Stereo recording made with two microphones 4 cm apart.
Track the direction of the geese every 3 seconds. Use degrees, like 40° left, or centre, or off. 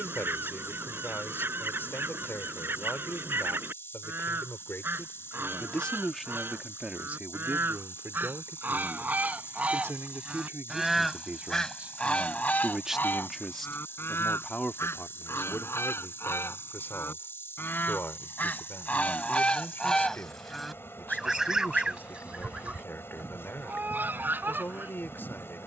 50° right, 50° right, 50° right, 10° right, 50° left, 60° left, 20° left, 30° right, 50° right.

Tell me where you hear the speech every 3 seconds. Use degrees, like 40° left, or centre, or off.
50° left, 40° left, 40° right, 50° right, 10° left, 40° left, 50° left, 50° left, 50° left.